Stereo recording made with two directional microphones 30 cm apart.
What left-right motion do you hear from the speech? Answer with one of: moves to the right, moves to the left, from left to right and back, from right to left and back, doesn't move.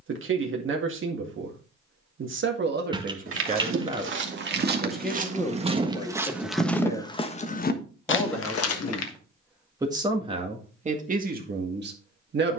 from right to left and back.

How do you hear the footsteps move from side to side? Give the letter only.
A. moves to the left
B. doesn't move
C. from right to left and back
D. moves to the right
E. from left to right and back
A.